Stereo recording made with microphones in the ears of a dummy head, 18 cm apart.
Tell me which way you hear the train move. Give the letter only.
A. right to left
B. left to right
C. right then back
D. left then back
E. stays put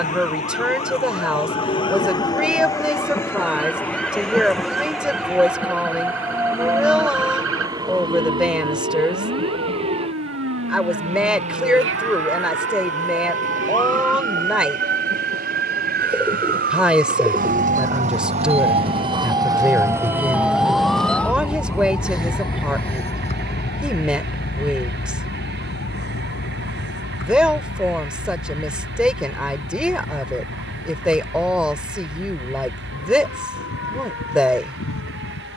B.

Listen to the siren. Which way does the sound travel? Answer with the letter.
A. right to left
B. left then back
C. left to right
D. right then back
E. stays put
A.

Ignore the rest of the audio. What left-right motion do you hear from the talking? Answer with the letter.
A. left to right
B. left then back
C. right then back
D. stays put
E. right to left
D.